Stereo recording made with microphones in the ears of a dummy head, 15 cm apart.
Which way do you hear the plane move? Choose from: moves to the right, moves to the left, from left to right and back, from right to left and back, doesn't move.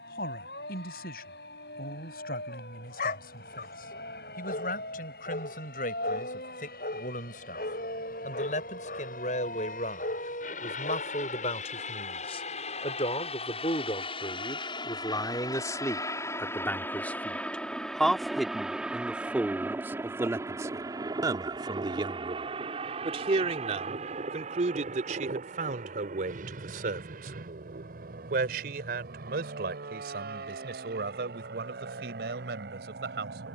moves to the right.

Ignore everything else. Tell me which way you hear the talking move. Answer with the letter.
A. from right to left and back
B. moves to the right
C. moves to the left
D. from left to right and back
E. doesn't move
B.